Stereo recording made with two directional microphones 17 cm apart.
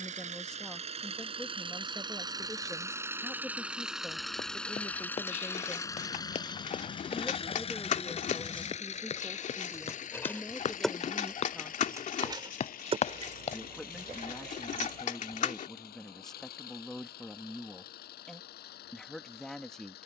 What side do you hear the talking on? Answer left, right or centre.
centre.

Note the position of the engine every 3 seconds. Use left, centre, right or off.
right, centre, left, left, left, left, left.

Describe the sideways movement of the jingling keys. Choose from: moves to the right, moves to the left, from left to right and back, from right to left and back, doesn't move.
moves to the right.